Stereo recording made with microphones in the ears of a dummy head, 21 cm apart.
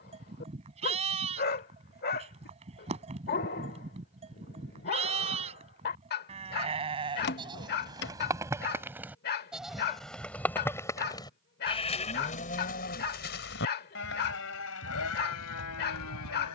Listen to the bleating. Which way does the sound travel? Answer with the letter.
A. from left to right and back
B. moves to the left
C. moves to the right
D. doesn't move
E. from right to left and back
B.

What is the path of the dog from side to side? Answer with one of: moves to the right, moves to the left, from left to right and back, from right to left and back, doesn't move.
doesn't move.